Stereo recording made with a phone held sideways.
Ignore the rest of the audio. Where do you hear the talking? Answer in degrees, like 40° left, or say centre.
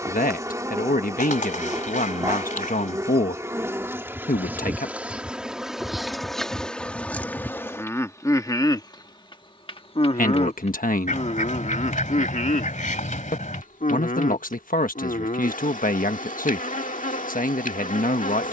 80° left.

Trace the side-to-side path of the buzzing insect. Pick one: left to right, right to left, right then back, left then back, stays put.
right to left.